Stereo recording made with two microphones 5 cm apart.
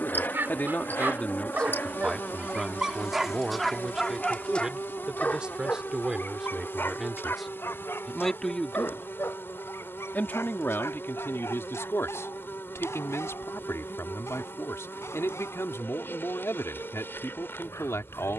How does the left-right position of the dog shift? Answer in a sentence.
In this clip you hear the dog move from right to left.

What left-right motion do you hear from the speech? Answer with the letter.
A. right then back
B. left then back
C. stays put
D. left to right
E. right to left
A.